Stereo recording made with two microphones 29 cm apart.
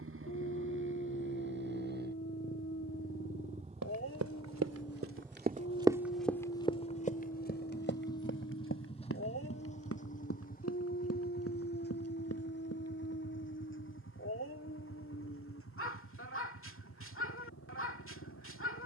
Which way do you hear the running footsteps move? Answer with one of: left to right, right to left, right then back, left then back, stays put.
right to left.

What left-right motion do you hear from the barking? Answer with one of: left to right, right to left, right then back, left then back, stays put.
stays put.